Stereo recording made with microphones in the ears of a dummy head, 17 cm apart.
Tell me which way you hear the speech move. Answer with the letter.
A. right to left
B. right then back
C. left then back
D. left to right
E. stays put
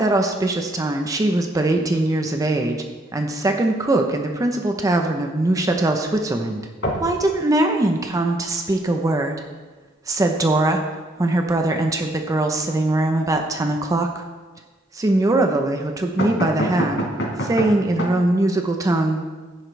E.